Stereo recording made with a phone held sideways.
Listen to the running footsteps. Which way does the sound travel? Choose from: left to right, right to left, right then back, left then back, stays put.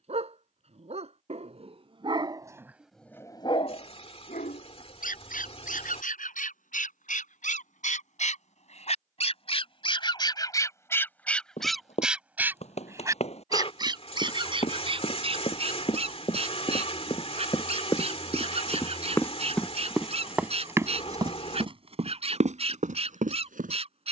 left to right.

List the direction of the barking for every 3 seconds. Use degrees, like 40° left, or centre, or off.
40° right, 60° left, 70° left, 30° left, 30° right, 50° right, 50° right, 50° right.